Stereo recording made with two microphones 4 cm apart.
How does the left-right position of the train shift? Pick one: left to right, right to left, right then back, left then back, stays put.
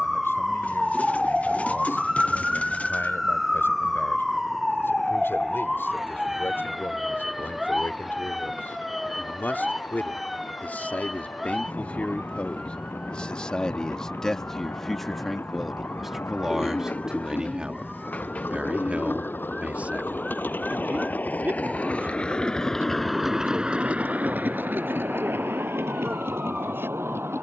left to right.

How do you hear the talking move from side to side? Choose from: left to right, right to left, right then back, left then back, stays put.
left to right.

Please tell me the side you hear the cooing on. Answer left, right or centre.
left.